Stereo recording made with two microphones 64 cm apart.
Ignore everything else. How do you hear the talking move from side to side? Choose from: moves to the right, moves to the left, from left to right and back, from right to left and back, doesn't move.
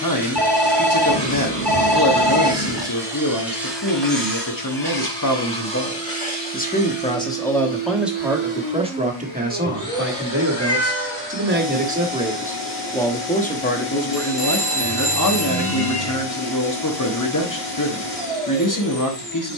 from left to right and back.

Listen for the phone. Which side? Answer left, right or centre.
right.